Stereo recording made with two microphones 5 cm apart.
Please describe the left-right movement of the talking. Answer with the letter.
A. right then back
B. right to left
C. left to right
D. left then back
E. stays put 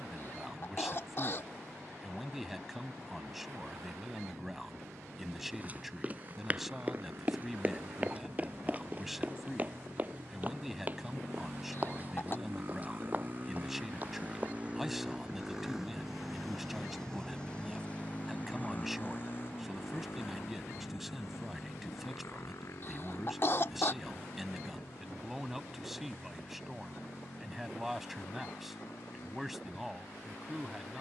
E.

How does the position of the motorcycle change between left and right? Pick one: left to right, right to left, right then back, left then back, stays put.
right to left.